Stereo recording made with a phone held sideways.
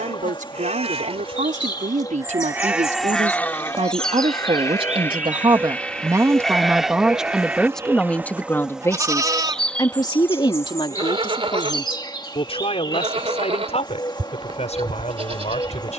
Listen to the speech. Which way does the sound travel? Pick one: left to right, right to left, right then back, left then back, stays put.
right to left.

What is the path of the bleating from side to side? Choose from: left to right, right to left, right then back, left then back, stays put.
left then back.